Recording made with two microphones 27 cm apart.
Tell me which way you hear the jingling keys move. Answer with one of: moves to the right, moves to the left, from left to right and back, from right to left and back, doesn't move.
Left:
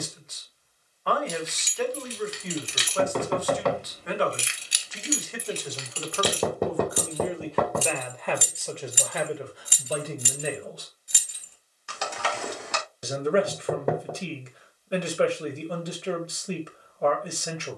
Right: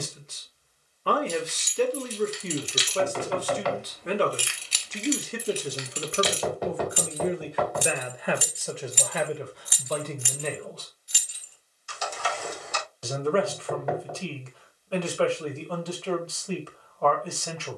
from left to right and back.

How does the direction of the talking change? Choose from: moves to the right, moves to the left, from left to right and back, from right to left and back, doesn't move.
moves to the left.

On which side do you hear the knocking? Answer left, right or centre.
left.